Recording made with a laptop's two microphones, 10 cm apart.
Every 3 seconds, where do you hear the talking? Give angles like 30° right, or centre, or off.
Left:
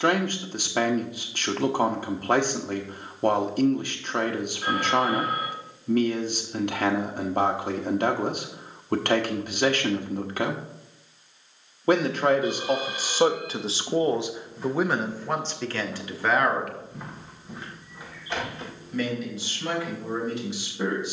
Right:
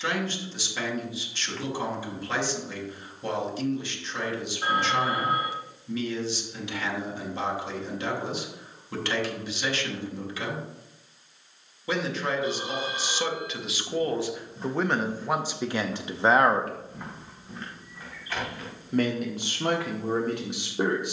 50° left, 50° left, 50° left, 50° left, 30° left, 20° right, 60° right.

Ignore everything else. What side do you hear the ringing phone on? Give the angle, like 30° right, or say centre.
30° right.